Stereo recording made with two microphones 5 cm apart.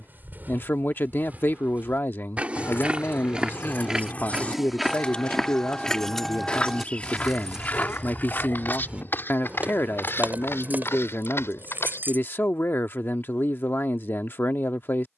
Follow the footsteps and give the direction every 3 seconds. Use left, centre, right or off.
right, centre, left, left, off.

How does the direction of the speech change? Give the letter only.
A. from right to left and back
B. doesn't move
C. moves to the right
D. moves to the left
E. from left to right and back
B.